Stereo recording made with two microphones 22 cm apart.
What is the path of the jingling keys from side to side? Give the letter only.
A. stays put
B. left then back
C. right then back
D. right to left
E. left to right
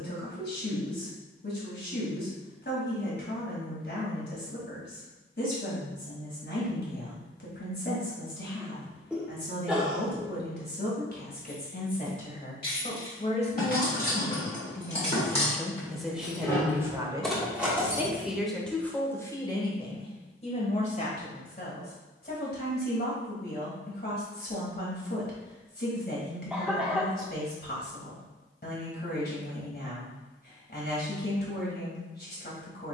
E.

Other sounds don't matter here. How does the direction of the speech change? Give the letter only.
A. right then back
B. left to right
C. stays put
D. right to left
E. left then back
A.